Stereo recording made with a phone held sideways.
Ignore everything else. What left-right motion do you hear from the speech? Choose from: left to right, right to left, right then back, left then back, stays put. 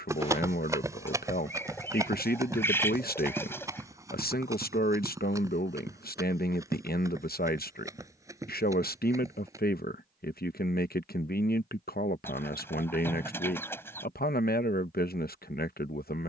stays put.